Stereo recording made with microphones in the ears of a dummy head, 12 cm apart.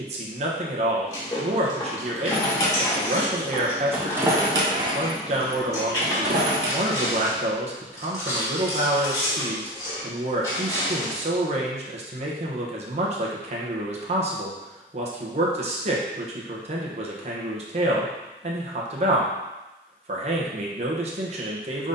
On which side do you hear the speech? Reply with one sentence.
In this clip you hear the speech on the right.